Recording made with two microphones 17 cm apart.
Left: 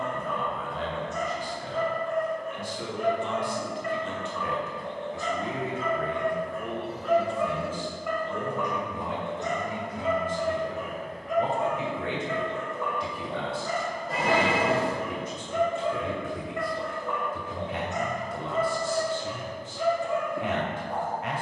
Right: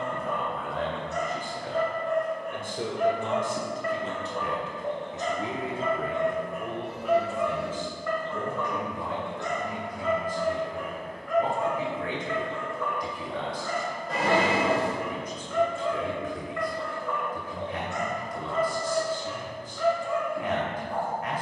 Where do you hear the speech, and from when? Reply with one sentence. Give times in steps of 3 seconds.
You can hear the speech on the right from 0 s, in the centre from 6 s and on the left from 9 s.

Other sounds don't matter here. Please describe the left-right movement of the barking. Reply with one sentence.
You can hear the barking go from the right side to the left.